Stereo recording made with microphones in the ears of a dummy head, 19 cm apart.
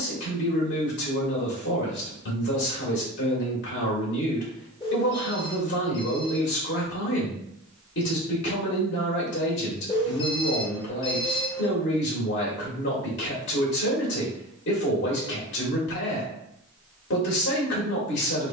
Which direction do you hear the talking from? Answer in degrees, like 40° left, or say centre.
50° left.